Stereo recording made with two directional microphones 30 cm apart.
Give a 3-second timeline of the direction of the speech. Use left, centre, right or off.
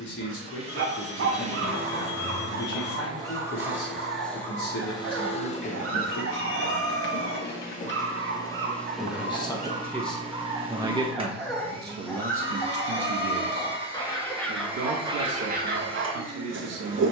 left, left, left, centre, right, right.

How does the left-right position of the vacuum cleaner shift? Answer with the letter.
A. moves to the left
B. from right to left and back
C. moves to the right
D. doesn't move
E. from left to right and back
B.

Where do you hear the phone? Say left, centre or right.
left.